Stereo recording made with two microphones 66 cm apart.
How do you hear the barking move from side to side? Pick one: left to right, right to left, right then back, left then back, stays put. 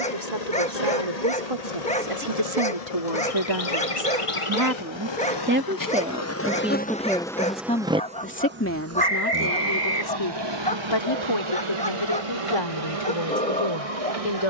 stays put.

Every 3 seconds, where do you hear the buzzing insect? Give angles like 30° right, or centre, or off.
70° left, 50° left, centre, 40° right, 60° right.